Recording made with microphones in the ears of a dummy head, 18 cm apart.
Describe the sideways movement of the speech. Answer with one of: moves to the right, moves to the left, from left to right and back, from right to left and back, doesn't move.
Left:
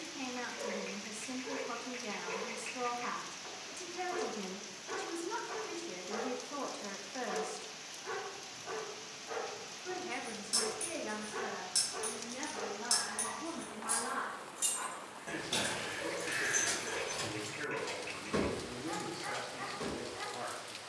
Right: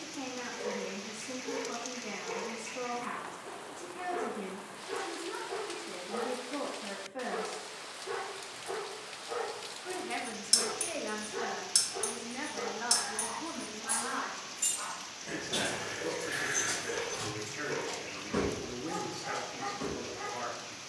moves to the right.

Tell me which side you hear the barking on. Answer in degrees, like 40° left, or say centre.
60° left.